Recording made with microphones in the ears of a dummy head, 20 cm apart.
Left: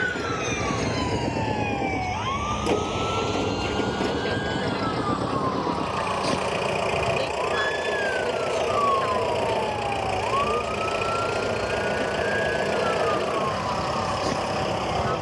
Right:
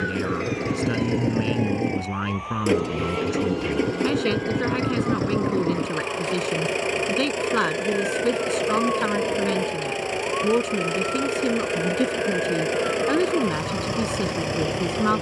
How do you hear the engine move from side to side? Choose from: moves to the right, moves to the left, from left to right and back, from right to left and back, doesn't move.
doesn't move.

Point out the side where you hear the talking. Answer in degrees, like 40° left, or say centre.
70° right.